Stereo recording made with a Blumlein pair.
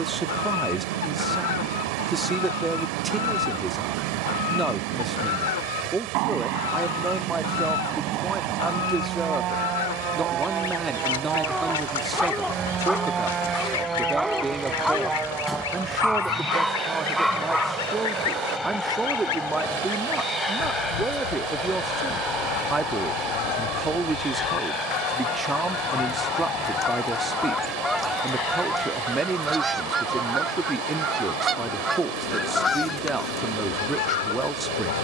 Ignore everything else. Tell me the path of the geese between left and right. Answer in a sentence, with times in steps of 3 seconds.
You can hear the geese on the left from 0 s, in the centre from 27 s and on the left from 33 s.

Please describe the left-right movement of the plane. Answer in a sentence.
In this clip you hear the plane move from right to left.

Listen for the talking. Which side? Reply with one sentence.
In this clip you hear the talking in the centre.